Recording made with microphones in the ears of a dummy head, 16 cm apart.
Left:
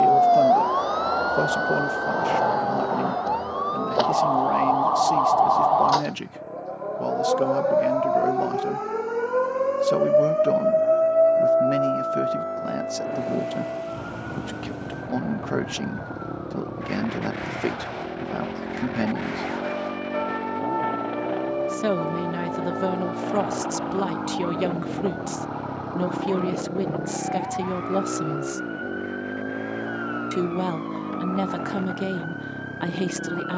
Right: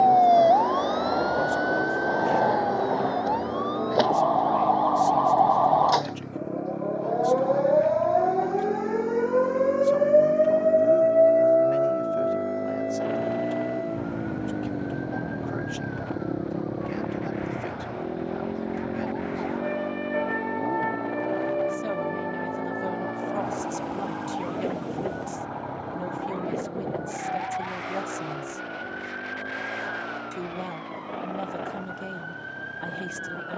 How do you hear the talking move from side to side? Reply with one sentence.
In this clip you hear the talking stay put.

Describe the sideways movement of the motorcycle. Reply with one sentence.
In this clip you hear the motorcycle move from right to left.